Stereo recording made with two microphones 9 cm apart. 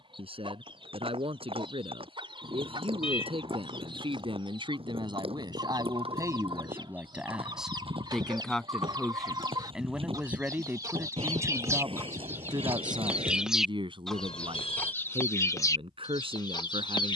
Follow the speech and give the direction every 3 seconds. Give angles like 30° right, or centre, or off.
80° right, 60° right, 10° right, 20° right, 60° right, 70° right.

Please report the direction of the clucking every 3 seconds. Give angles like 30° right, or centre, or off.
60° right, 60° right, 50° right, 40° right, 10° right, 40° left.